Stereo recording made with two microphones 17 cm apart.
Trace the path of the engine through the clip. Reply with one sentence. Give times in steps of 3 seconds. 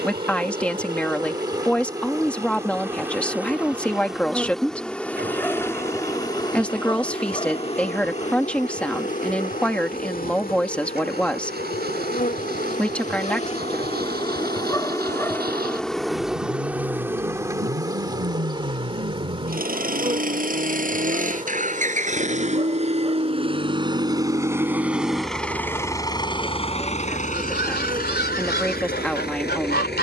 You can hear the engine on the right from 0 s, in the centre from 24 s and on the left from 27 s.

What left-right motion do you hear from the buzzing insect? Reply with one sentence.
In this clip you hear the buzzing insect go left and come back.